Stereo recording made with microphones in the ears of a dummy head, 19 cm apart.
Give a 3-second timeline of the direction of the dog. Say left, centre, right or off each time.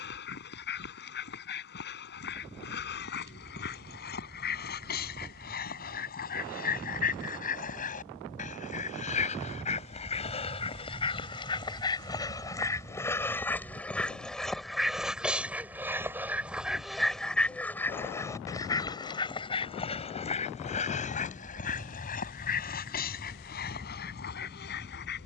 left, left, left, left, centre, centre, left, left, left.